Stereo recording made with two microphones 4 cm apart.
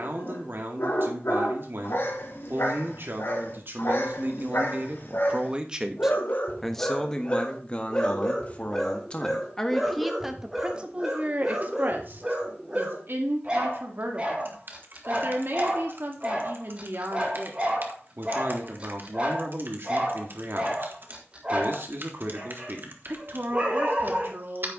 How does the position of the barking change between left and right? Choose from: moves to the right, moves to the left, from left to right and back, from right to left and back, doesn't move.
moves to the right.